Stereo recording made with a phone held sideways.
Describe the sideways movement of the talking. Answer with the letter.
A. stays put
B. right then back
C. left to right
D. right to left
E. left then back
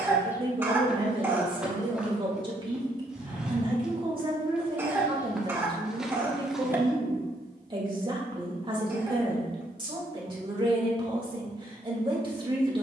A.